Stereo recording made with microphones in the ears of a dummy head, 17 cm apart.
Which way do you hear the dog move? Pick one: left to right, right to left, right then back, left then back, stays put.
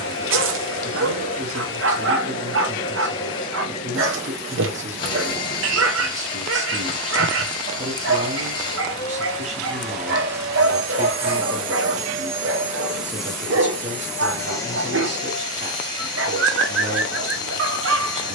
stays put.